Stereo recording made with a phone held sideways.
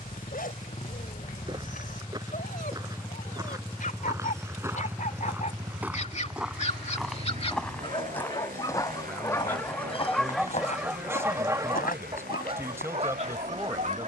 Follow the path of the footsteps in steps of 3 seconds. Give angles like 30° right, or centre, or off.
30° right, 20° right, 10° left, 40° left, 70° left.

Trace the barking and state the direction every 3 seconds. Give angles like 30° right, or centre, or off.
60° left, 60° left, 40° left, centre, 40° right.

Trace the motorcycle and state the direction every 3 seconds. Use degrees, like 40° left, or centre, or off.
30° left, centre, 50° right, 70° right, 80° right.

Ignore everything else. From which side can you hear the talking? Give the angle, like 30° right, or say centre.
20° right.